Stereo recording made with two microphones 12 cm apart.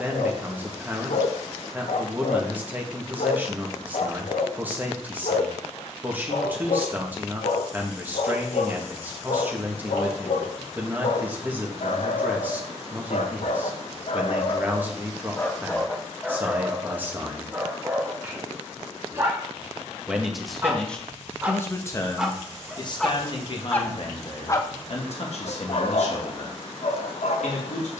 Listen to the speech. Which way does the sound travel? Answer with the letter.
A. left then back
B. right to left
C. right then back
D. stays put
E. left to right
B.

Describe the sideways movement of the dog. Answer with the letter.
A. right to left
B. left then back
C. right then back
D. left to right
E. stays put
C.